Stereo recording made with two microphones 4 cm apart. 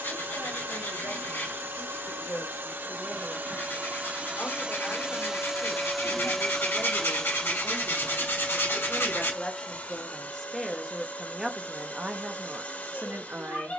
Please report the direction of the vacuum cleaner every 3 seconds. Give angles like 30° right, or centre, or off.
60° right, 30° right, 20° left, 40° left, 40° left.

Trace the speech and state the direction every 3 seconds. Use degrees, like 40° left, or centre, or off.
50° left, 50° left, 40° left, 10° left, 40° right.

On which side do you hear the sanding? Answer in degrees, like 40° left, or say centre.
60° left.